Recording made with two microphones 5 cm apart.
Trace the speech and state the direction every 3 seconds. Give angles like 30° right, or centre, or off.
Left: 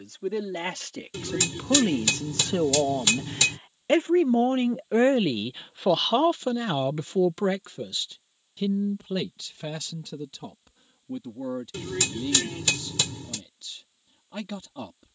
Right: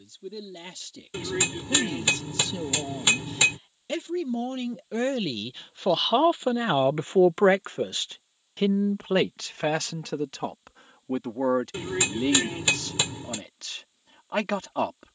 60° left, 30° left, 40° right, 70° right, 80° right.